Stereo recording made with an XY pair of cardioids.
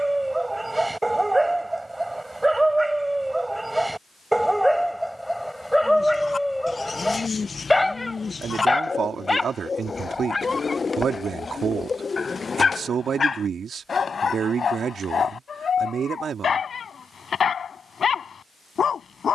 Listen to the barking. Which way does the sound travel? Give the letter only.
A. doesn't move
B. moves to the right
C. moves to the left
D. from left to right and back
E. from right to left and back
C.